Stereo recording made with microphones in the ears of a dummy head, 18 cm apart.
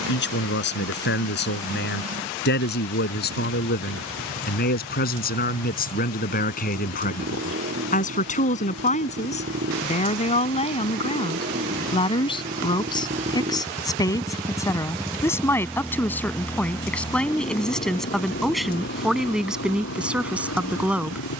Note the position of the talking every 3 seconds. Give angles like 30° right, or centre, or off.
60° left, 50° left, 40° left, 30° left, 20° left, 10° left, centre.